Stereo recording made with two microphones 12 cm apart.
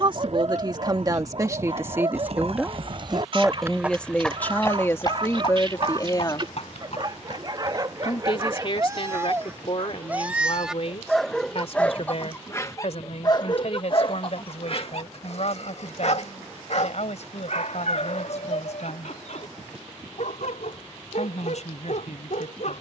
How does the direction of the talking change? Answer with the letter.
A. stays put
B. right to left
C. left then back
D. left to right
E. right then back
B.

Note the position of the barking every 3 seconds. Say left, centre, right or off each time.
right, right, right, centre, left, left, left, left.